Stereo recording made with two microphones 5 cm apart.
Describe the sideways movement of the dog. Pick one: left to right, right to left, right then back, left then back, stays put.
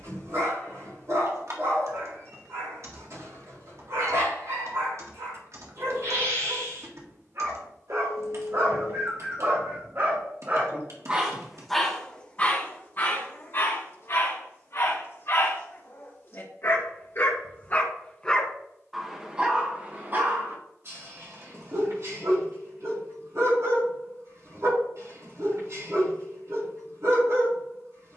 left then back.